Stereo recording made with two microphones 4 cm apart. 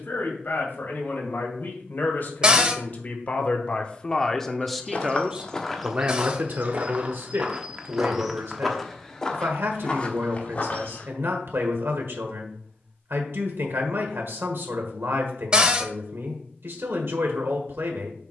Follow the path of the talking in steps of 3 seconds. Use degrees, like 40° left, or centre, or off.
50° left, 10° left, 60° right, 70° right, 70° right, 70° right.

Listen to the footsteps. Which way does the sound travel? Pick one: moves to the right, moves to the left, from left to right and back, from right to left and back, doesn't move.
from left to right and back.